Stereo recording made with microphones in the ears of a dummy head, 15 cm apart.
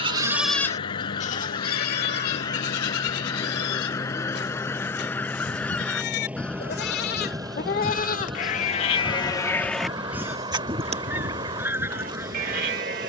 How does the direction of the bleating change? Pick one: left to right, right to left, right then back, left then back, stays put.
left then back.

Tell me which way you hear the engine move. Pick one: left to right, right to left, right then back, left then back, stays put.
left to right.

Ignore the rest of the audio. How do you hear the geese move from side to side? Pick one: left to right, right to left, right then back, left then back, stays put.
left to right.